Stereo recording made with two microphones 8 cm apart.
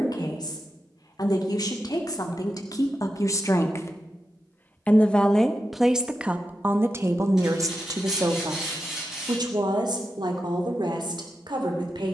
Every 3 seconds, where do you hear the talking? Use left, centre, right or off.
left, left, right, right.